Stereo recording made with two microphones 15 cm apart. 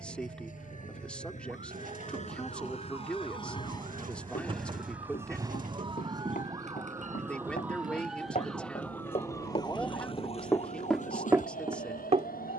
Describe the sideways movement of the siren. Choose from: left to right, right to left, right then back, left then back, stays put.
right to left.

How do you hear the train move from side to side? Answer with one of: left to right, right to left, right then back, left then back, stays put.
left to right.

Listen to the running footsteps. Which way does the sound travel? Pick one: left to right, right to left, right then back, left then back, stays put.
left to right.